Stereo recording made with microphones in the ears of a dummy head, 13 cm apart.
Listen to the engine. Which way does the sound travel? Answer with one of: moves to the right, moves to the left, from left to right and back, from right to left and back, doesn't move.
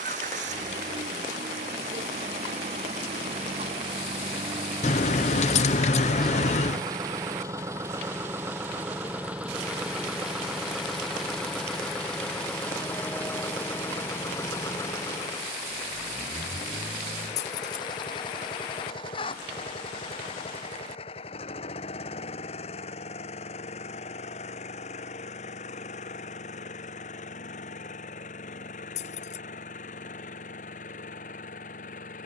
moves to the left.